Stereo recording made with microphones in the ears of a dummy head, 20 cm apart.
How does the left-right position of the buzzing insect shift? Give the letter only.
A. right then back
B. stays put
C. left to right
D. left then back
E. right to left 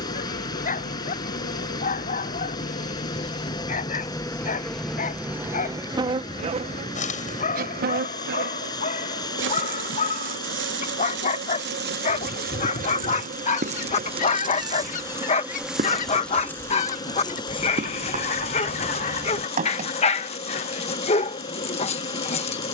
A.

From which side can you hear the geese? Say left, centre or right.
left.